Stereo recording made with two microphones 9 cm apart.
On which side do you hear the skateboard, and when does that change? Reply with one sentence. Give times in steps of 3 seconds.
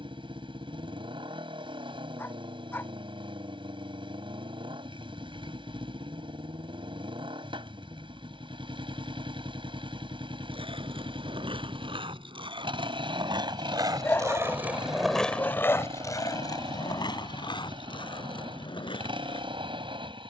You can hear the skateboard not at all from 0 s, on the right from 9 s and on the left from 15 s.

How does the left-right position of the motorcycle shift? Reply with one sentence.
You can hear the motorcycle stay in one place.